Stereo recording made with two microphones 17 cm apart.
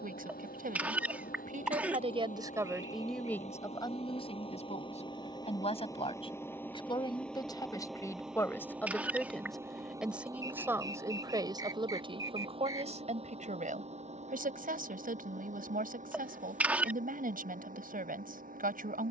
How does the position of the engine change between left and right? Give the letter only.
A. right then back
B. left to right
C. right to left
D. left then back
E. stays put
B.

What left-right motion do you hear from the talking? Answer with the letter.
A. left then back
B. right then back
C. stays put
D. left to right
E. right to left
A.